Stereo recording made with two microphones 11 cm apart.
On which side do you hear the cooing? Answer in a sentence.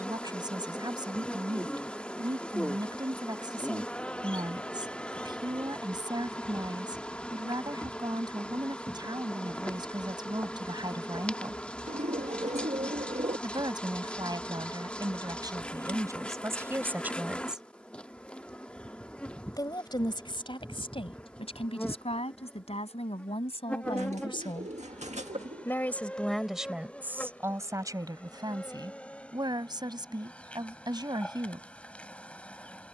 You can hear the cooing on the right.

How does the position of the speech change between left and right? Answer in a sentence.
You can hear the speech go left and come back.